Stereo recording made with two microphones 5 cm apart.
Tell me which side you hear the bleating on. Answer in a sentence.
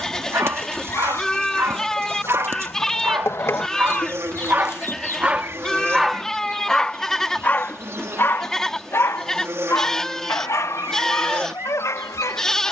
You can hear the bleating in the centre.